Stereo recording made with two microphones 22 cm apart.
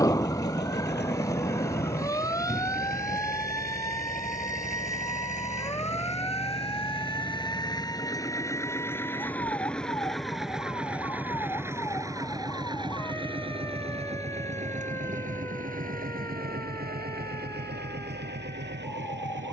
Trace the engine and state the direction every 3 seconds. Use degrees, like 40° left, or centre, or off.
50° left, 40° left, 20° left, centre, 20° right, 40° right, 50° right.